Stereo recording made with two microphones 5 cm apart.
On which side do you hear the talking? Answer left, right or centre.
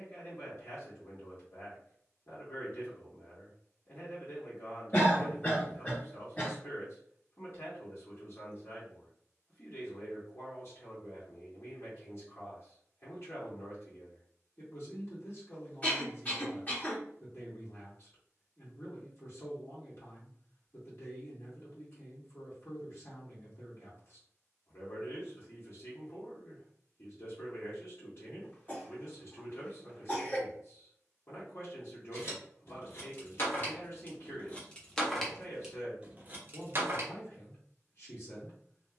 left.